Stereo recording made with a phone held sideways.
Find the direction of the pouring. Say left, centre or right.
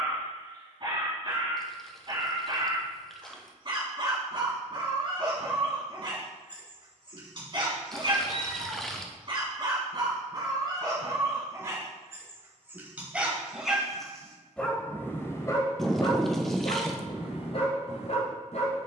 centre.